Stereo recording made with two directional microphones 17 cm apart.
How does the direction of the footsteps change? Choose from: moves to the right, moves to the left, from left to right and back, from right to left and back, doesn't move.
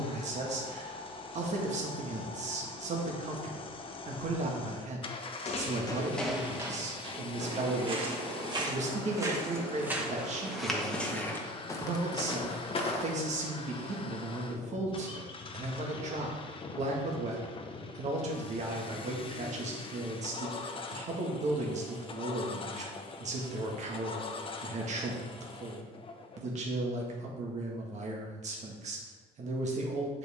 from left to right and back.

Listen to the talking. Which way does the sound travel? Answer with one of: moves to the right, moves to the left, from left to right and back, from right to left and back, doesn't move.
doesn't move.